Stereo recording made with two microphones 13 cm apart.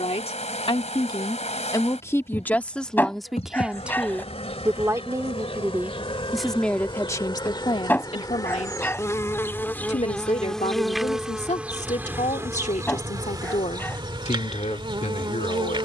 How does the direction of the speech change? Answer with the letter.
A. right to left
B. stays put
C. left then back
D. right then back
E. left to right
D.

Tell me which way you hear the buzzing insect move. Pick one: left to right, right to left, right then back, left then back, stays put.
left to right.